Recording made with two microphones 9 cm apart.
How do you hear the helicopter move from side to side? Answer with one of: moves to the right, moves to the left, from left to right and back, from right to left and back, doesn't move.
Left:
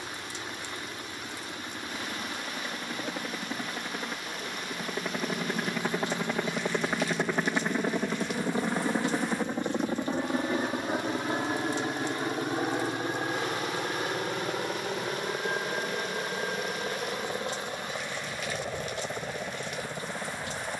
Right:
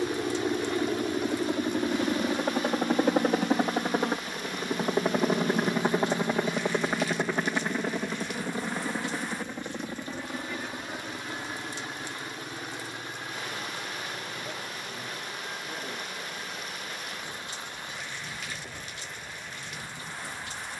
moves to the left.